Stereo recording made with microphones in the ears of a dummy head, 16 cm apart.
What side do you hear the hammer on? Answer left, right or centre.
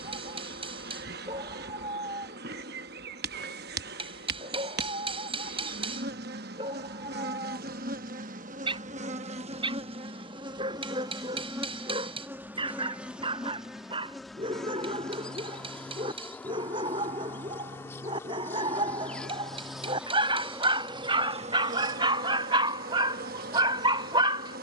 right.